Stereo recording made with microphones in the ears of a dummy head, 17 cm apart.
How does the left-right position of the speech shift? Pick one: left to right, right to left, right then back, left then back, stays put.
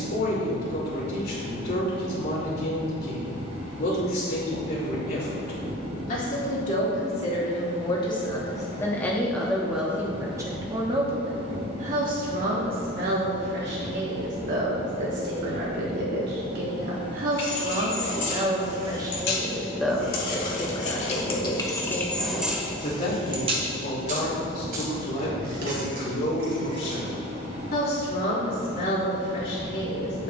right then back.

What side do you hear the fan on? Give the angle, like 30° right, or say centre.
30° right.